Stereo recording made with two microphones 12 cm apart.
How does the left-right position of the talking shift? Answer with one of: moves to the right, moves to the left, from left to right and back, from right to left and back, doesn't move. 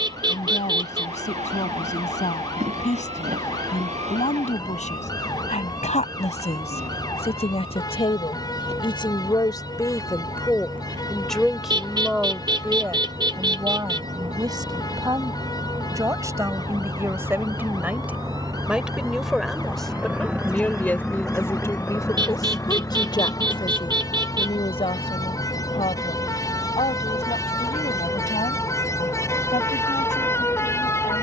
from left to right and back.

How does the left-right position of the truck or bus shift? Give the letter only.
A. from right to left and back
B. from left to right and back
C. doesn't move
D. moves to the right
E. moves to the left
E.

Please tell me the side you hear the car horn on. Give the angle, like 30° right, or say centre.
40° right.